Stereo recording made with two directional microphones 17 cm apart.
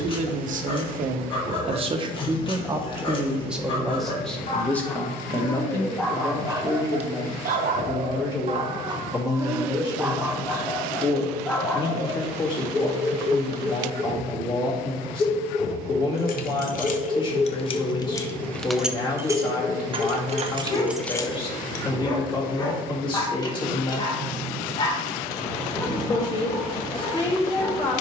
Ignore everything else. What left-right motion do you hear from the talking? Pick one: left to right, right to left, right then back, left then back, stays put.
right to left.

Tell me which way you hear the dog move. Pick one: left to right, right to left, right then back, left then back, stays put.
right then back.